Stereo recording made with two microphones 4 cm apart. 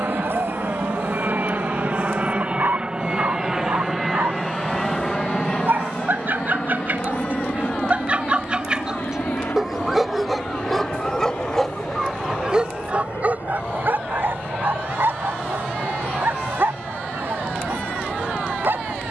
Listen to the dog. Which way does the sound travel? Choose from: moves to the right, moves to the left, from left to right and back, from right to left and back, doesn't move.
from right to left and back.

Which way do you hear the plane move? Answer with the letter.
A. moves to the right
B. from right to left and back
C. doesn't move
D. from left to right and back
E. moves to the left
E.